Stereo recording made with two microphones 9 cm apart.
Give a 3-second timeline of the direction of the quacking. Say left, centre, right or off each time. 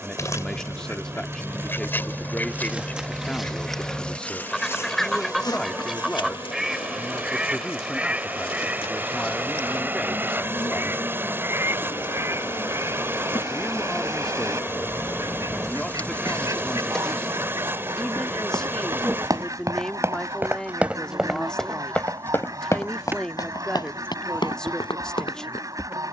left, centre, centre, right, right, right, right, right, right.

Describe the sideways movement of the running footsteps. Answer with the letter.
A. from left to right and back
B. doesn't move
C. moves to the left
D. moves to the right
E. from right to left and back
C.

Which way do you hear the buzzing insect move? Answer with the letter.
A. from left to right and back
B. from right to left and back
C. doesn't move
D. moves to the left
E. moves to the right
B.